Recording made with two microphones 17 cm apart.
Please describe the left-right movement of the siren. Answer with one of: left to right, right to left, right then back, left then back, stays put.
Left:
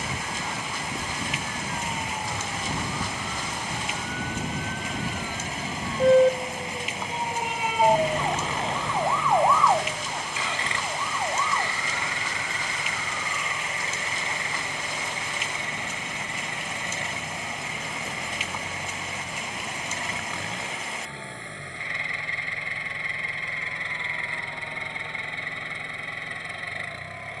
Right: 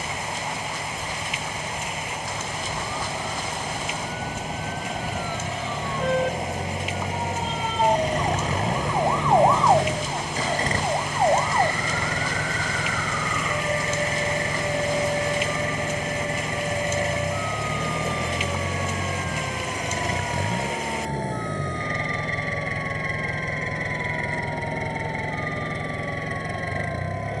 left to right.